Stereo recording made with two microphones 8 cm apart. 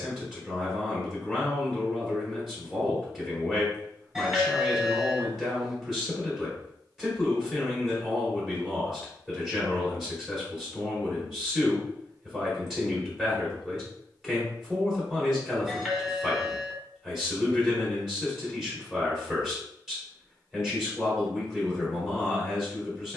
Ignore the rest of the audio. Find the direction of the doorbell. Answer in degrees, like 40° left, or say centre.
10° right.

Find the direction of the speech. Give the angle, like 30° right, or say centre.
centre.